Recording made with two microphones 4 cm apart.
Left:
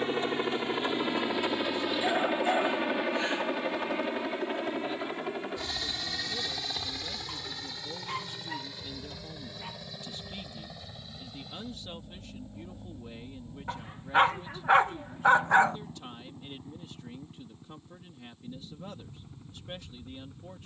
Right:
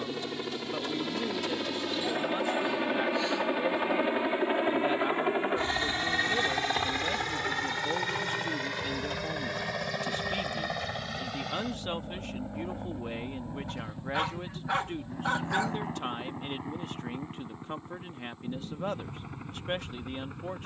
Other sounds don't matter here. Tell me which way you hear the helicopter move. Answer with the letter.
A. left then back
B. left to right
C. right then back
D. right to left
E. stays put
B.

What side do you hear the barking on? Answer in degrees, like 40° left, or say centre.
40° left.